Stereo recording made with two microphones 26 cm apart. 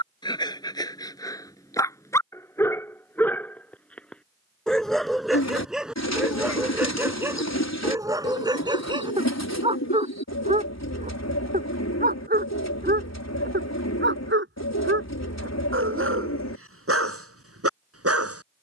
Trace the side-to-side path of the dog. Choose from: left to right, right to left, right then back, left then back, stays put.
left to right.